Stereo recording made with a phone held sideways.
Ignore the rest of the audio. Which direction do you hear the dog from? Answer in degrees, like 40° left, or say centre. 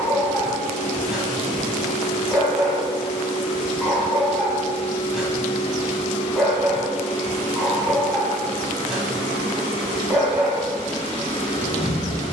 centre.